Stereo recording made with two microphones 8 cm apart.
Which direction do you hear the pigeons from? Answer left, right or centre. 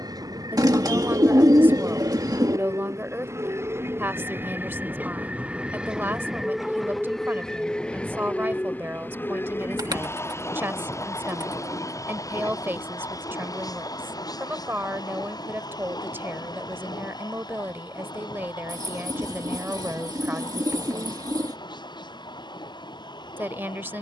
right.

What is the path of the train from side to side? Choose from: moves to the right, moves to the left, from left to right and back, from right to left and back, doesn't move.
moves to the left.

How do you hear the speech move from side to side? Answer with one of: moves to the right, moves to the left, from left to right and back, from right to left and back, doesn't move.
doesn't move.